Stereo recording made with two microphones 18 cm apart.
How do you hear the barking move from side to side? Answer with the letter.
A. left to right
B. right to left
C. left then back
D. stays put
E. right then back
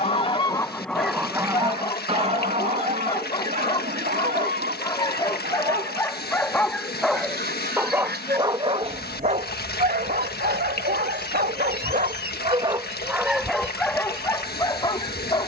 E.